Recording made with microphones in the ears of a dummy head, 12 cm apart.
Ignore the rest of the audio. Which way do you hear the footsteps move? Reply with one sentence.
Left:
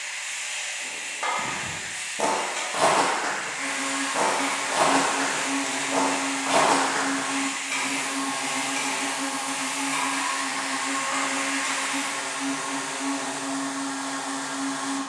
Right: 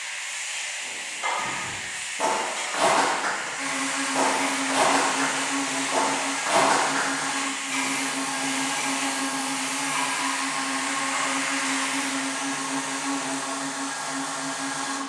In this clip you hear the footsteps move from left to right and back again.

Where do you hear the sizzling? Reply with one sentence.
You can hear the sizzling on the left.